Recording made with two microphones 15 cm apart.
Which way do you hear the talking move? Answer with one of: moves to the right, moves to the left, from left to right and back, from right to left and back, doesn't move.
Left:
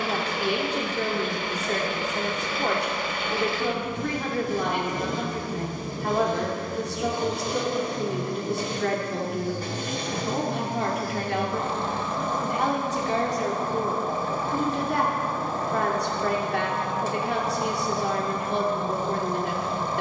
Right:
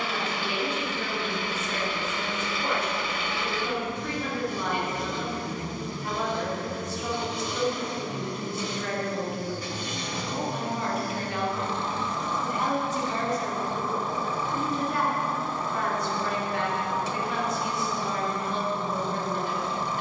doesn't move.